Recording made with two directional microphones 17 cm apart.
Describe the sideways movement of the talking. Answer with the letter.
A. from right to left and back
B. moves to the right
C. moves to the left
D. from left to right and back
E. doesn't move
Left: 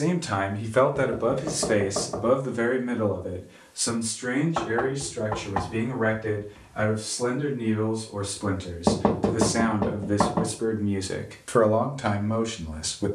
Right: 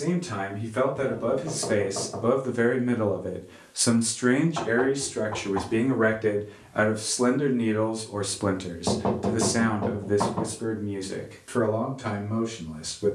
D.